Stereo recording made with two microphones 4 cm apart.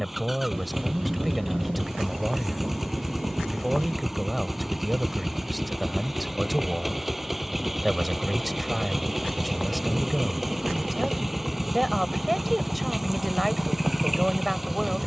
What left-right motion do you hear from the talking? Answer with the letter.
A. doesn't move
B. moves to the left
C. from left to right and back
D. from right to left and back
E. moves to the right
A.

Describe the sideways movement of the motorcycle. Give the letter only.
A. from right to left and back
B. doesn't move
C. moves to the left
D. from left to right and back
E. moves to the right
B.